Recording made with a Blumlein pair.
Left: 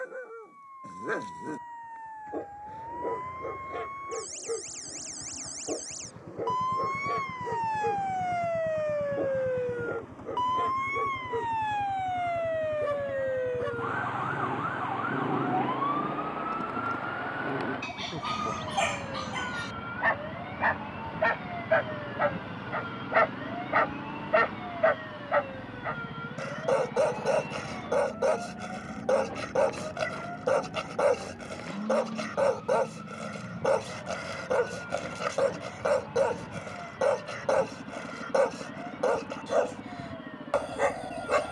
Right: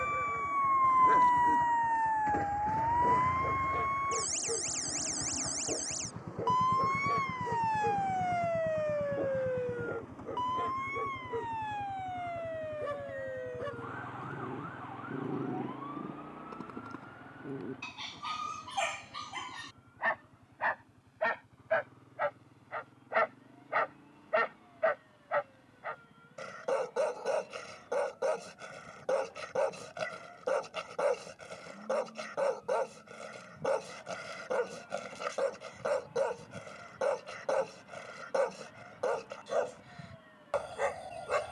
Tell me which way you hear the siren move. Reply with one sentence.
You can hear the siren move from right to left.